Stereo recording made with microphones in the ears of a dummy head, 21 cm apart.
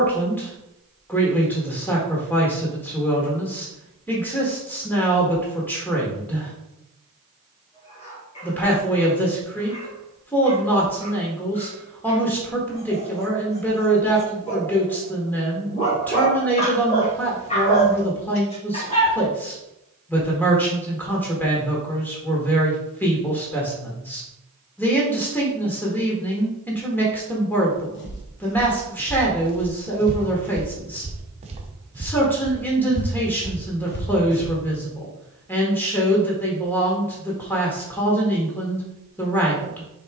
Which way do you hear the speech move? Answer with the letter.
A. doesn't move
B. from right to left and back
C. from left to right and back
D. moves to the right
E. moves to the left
A.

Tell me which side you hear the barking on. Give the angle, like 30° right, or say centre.
30° left.